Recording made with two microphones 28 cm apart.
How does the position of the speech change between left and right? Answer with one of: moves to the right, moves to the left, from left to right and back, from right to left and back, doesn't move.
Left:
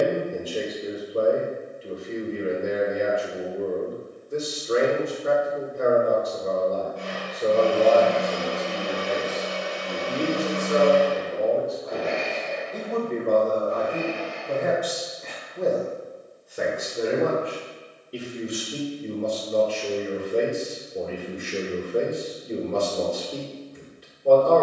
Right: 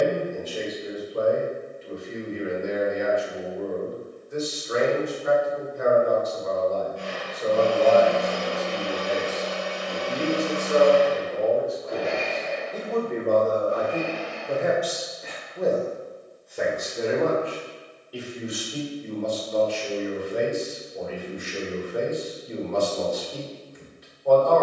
from left to right and back.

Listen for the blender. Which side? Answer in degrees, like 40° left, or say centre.
30° right.